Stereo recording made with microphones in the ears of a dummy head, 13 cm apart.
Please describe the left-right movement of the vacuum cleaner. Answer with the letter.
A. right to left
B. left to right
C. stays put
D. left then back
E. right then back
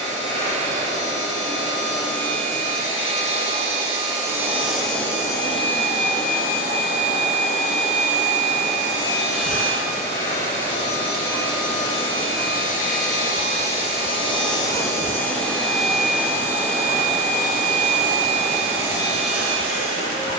D.